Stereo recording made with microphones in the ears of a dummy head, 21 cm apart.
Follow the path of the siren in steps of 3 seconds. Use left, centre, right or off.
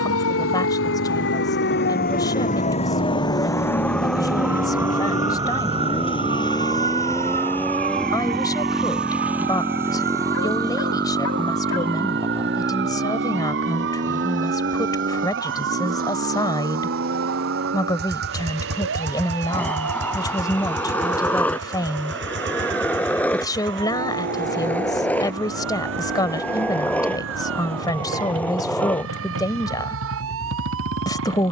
left, centre, right, right, right, right, right, right, right, right, right.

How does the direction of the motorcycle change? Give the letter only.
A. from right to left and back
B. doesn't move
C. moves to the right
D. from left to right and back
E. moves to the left
C.